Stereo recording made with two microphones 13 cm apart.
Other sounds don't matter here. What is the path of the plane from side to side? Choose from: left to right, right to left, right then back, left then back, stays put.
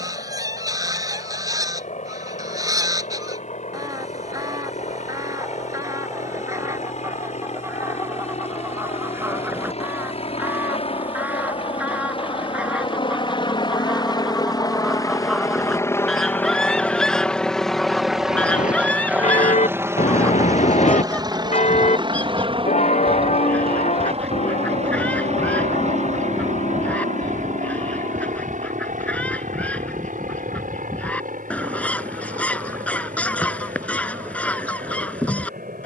left to right.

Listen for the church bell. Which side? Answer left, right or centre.
left.